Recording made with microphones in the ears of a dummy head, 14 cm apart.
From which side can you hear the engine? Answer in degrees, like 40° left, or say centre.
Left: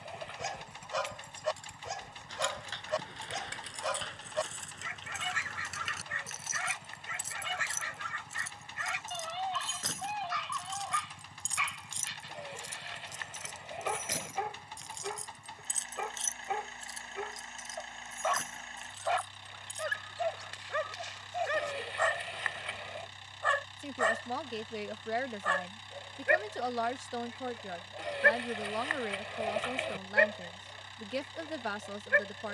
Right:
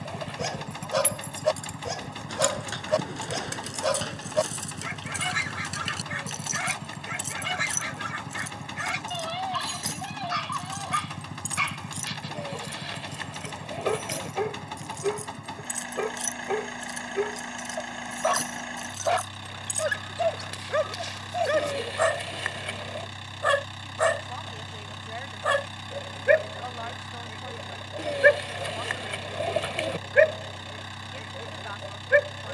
70° right.